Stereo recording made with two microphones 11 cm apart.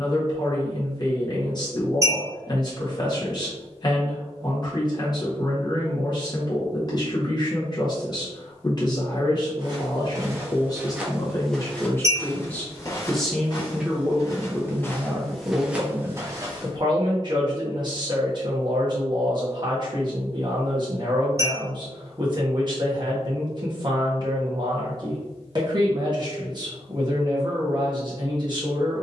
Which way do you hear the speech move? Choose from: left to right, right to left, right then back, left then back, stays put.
left to right.